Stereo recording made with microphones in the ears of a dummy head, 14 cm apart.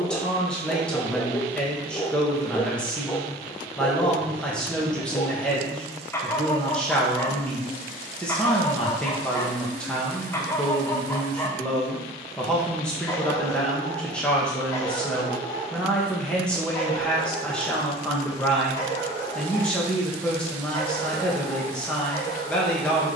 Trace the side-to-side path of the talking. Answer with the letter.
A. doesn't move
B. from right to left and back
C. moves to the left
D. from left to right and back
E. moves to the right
A.